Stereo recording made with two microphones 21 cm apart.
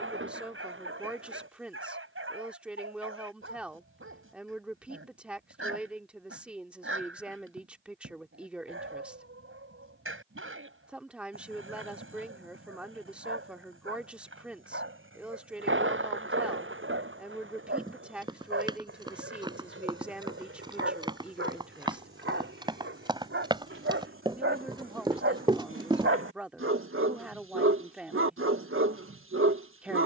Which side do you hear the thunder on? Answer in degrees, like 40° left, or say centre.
70° right.